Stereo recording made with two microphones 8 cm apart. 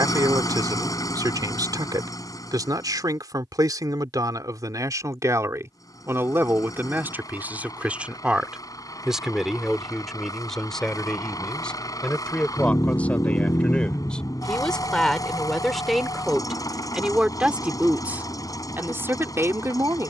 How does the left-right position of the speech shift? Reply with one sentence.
You can hear the speech move from right to left and back again.